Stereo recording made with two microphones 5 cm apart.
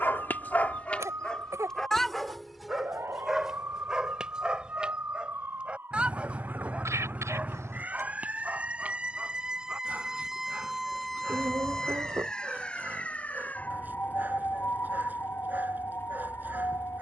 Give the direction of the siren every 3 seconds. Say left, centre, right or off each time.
right, right, right, centre, left, left.